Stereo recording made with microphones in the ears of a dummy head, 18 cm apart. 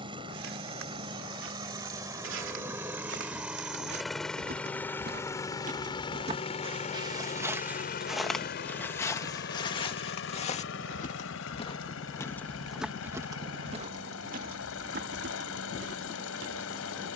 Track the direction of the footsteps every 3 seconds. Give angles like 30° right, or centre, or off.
70° right, 50° right, 10° right, 30° left, 20° right, 60° right.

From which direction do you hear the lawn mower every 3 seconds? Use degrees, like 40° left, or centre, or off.
20° right, 10° left, 40° left, 70° left, 80° left, 80° left.